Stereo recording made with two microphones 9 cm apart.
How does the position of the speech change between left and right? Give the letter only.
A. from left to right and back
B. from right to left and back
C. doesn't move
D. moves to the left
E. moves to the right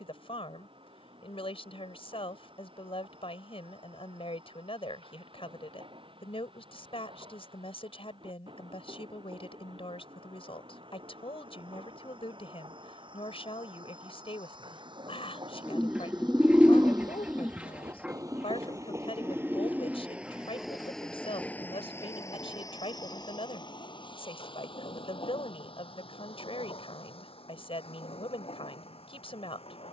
C.